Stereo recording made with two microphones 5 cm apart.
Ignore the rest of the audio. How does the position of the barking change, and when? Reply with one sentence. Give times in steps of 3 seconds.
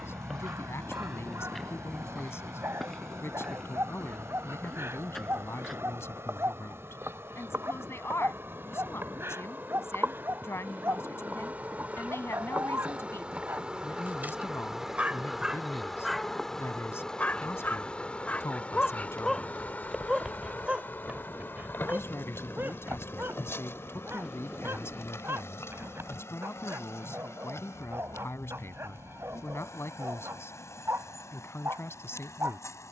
You can hear the barking on the right from 0 s, in the centre from 15 s and on the right from 21 s.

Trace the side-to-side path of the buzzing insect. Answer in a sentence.
You can hear the buzzing insect go from the right side to the left.